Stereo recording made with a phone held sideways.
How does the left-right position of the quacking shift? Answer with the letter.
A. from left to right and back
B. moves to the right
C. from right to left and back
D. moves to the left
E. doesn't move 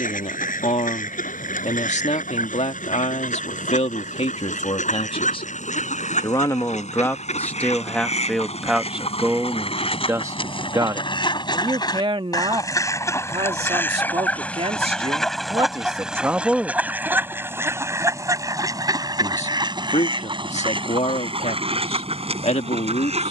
B.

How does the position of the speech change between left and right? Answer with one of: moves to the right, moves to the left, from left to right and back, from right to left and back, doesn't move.
from left to right and back.